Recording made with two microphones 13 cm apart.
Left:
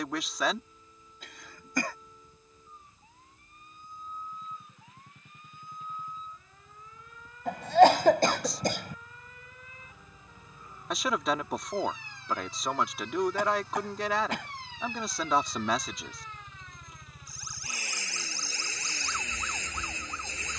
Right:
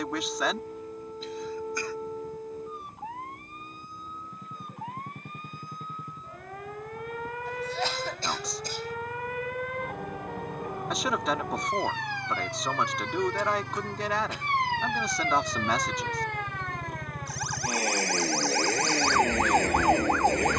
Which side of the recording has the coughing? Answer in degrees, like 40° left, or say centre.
70° left.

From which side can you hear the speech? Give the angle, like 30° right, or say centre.
centre.